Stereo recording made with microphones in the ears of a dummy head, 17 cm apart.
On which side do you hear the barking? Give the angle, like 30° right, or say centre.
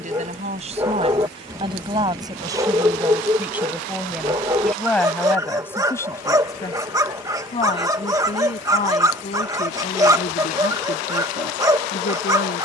20° right.